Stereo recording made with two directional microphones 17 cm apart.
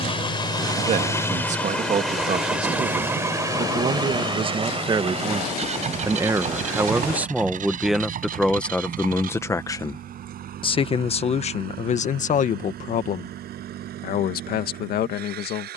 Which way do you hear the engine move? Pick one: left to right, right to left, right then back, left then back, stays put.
left to right.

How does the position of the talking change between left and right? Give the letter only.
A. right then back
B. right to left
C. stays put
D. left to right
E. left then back
B.